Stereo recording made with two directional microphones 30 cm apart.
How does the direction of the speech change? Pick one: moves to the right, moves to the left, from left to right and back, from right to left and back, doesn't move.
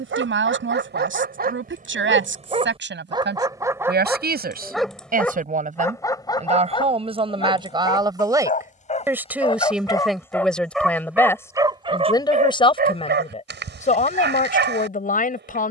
moves to the left.